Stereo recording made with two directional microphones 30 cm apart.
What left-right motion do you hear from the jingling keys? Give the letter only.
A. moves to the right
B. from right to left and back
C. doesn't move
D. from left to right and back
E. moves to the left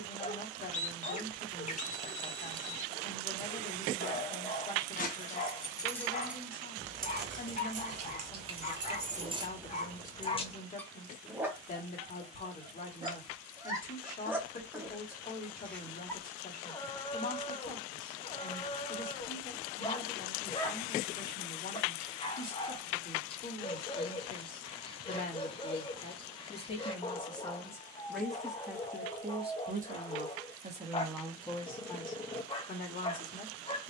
D.